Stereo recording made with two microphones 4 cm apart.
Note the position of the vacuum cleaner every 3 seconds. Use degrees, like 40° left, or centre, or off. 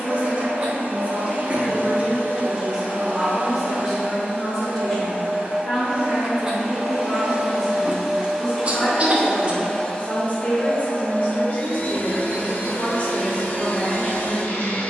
50° right, 40° right, 20° right, 20° left, 60° left.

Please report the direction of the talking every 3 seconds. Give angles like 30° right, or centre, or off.
20° right, 10° left, 30° left, 30° left, 30° left.